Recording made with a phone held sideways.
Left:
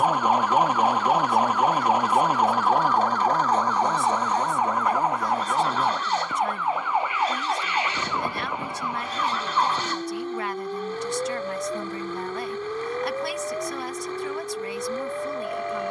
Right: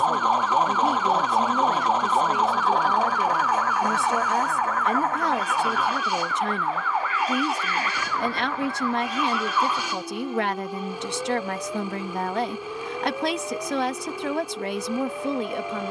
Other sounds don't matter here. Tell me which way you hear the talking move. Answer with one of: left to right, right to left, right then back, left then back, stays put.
stays put.